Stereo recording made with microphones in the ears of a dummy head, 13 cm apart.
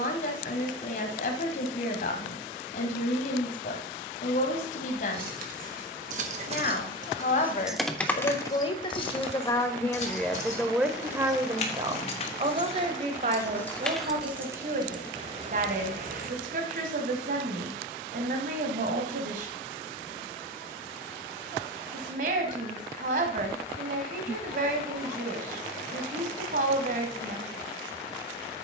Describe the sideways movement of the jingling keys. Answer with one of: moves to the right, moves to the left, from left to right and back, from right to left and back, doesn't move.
from right to left and back.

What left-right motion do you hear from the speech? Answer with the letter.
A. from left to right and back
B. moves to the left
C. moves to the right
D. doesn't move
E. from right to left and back
C.